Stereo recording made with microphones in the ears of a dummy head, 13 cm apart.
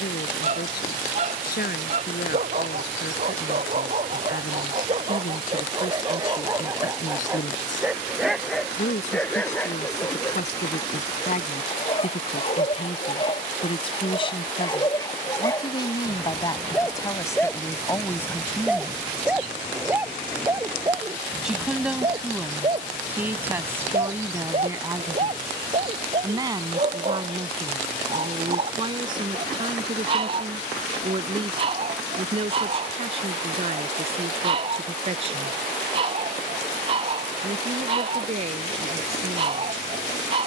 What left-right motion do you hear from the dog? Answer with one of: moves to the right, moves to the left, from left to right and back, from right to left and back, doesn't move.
from right to left and back.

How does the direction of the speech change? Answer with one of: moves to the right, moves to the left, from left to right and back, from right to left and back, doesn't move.
moves to the right.